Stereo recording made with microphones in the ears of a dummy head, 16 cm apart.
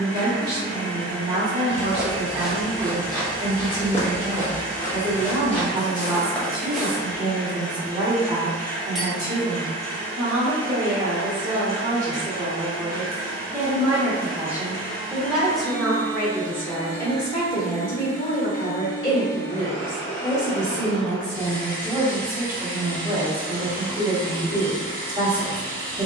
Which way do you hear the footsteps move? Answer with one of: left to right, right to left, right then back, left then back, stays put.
left then back.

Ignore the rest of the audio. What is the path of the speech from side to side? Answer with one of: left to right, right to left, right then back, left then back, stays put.
left then back.